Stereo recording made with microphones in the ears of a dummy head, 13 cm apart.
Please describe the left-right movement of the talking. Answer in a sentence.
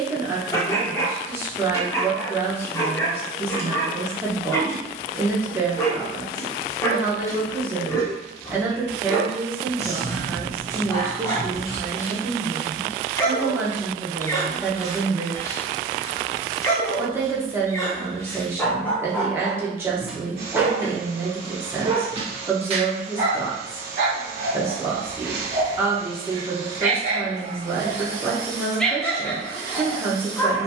In this clip you hear the talking stay in one place.